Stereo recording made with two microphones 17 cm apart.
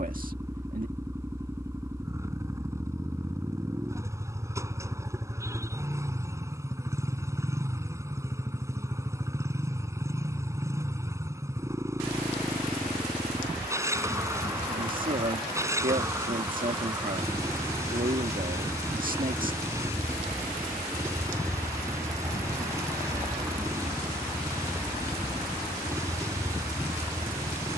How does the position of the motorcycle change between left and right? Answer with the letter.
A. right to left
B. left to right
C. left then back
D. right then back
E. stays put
E.